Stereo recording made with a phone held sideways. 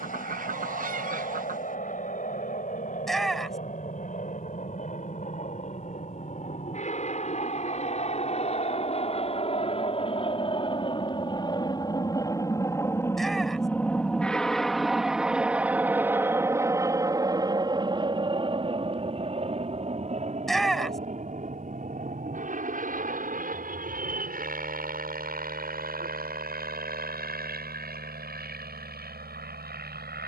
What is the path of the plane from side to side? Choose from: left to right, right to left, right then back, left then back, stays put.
left to right.